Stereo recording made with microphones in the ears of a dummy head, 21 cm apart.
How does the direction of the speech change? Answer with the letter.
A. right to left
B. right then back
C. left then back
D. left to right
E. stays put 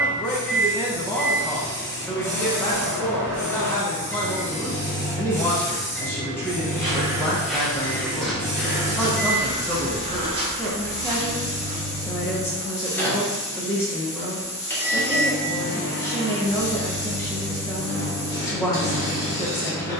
E.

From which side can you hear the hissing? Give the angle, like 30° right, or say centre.
10° left.